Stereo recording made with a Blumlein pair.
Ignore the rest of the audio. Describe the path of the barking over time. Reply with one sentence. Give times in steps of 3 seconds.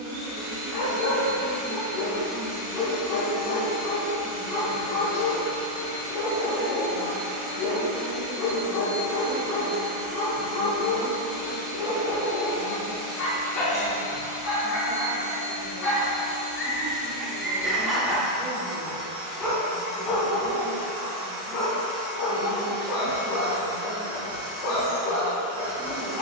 You can hear the barking on the left from 0 s, in the centre from 15 s and on the left from 21 s.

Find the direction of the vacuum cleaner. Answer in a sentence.
In this clip you hear the vacuum cleaner on the right.